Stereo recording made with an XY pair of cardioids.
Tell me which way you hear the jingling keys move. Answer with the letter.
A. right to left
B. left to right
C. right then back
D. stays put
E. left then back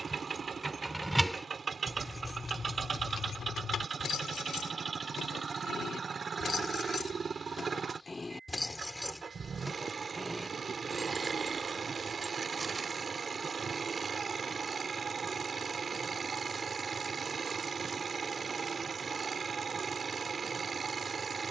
E.